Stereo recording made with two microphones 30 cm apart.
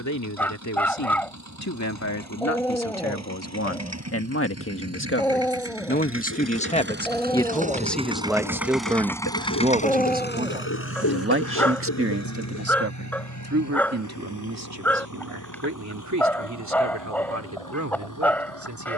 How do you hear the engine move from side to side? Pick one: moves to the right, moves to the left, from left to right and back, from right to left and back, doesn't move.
moves to the left.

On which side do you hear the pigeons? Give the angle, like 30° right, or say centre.
70° left.